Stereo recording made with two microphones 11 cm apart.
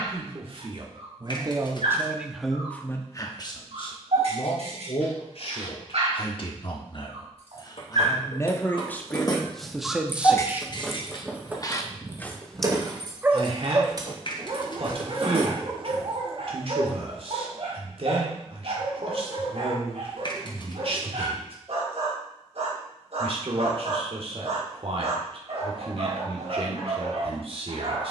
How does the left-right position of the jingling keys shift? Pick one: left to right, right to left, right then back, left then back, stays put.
left to right.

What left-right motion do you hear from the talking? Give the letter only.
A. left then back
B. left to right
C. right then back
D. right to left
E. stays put
A.